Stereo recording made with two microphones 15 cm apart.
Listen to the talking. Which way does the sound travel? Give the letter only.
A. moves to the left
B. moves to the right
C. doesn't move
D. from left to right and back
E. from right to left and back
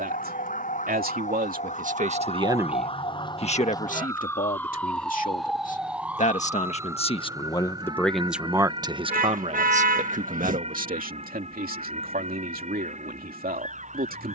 E.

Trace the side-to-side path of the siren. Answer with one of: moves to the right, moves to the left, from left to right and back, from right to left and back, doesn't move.
moves to the right.